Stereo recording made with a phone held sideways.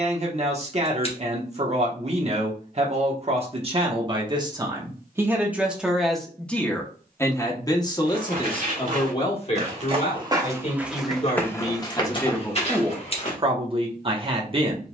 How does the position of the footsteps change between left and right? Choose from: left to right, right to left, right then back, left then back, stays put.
right to left.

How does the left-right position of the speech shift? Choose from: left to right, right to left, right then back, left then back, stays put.
left then back.